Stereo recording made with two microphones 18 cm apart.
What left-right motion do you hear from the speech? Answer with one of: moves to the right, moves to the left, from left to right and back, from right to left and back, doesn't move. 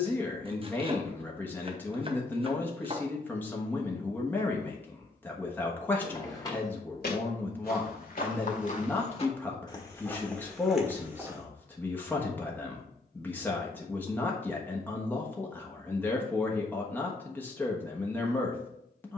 doesn't move.